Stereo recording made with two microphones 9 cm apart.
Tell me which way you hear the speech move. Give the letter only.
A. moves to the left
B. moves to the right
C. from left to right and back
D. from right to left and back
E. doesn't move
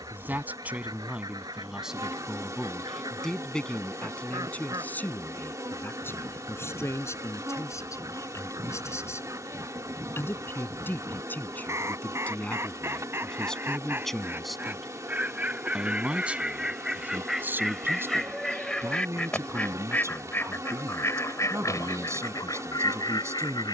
D.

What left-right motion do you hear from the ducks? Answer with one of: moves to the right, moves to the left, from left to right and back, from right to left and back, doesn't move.
moves to the left.